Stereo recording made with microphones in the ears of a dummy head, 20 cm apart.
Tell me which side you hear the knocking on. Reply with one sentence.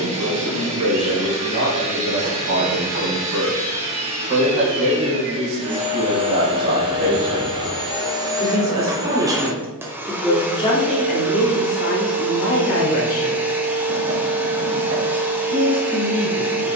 You can hear the knocking on the right.